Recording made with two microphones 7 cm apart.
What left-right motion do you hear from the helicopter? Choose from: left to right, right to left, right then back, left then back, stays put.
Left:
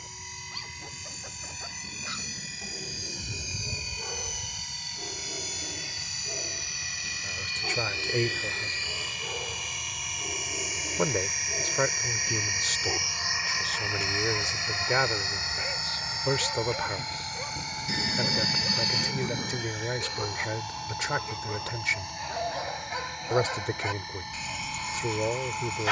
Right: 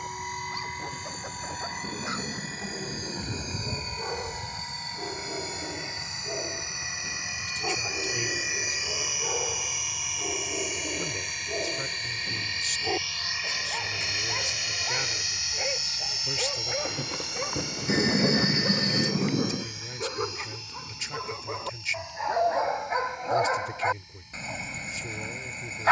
right to left.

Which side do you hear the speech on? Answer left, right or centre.
left.